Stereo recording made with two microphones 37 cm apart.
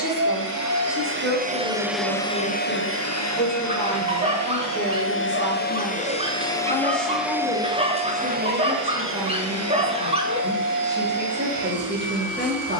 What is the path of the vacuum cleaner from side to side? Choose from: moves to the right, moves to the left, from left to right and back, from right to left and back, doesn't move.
from right to left and back.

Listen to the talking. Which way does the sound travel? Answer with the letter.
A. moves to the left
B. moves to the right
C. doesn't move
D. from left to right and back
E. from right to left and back
B.